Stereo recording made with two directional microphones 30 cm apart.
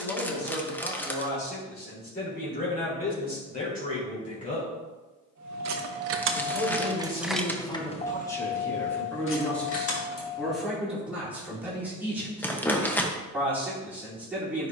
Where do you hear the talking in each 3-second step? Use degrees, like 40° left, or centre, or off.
30° left, 30° left, 10° left, centre, 10° right.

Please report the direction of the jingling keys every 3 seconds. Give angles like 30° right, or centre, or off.
off, 60° right, centre, 50° left, off.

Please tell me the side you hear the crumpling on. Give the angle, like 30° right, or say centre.
10° left.